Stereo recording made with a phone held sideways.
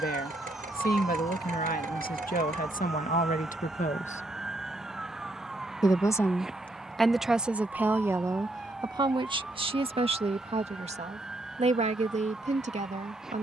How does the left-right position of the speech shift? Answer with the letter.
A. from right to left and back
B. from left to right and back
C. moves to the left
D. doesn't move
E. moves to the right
E.